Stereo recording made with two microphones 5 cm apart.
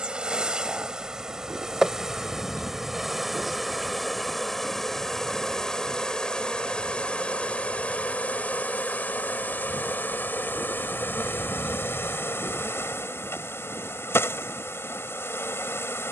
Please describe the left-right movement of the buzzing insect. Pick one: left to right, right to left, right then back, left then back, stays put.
right to left.